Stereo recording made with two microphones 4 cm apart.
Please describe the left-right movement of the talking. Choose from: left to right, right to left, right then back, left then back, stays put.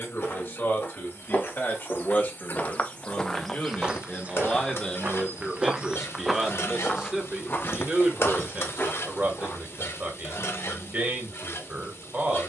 left to right.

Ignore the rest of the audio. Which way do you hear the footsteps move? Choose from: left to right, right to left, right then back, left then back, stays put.
right then back.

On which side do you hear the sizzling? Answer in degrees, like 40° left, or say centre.
70° left.